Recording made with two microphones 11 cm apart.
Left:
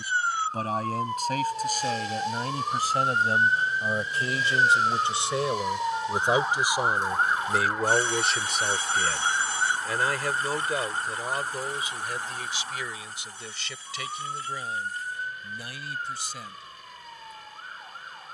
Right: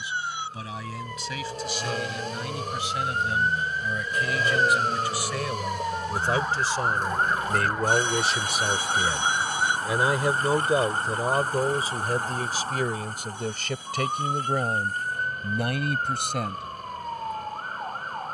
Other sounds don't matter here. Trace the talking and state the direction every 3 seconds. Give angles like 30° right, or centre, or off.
40° left, 30° left, 10° left, 30° right, 50° right, 60° right.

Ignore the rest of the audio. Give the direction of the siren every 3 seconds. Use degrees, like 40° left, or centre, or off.
40° left, 20° left, centre, 20° right, 40° right, 50° right.